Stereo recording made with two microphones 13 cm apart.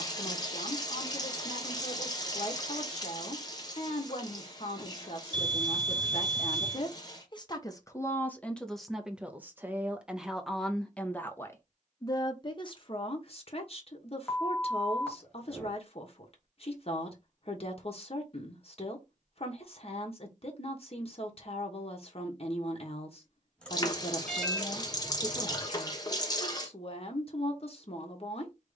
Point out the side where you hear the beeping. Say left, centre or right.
centre.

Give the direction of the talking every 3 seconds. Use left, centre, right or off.
left, left, left, centre, left, left, left, left, left, left.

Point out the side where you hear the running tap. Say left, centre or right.
left.